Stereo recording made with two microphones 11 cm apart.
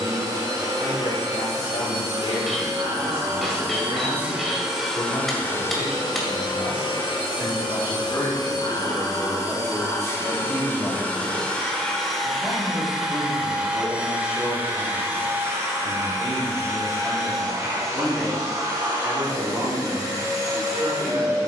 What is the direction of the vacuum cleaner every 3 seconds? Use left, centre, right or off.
right, centre, left, left, centre, right, right.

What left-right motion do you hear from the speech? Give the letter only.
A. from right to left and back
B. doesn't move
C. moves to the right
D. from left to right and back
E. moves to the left
C.